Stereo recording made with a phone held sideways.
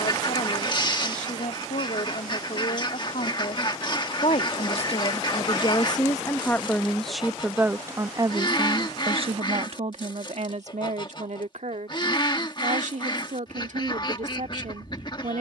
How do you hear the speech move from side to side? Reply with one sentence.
In this clip you hear the speech move to the right.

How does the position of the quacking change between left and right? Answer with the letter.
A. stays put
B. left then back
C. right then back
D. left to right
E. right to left
A.